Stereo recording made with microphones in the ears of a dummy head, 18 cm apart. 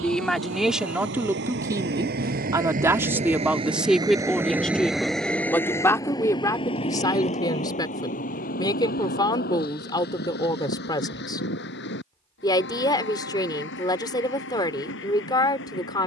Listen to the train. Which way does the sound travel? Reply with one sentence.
You can hear the train travel towards the left.